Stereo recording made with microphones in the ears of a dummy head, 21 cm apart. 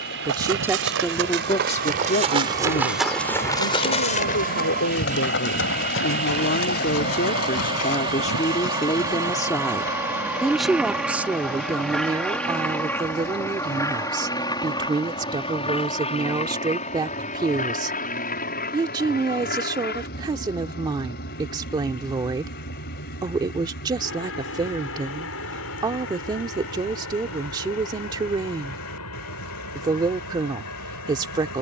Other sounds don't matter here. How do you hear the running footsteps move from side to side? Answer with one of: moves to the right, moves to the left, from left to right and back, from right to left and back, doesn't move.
moves to the left.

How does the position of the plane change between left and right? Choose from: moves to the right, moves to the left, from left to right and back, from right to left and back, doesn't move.
moves to the left.